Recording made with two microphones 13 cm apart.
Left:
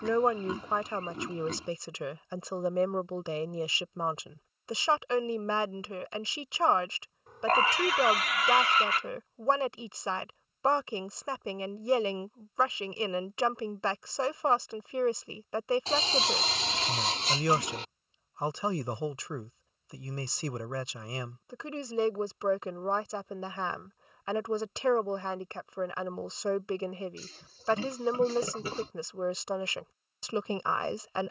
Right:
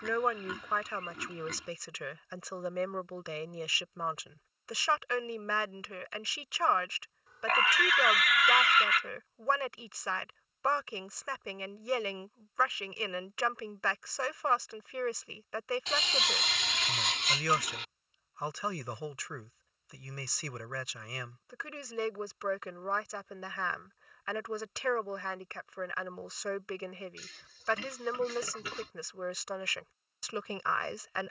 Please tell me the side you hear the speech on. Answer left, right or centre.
left.